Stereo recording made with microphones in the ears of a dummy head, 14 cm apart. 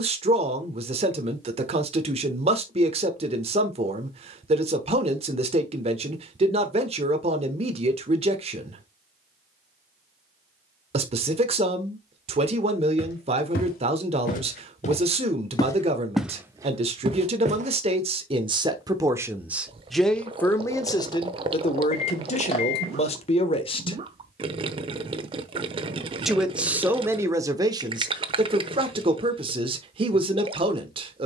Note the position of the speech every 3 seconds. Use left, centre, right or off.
right, right, right, right, right, right, centre, left, centre, right, right.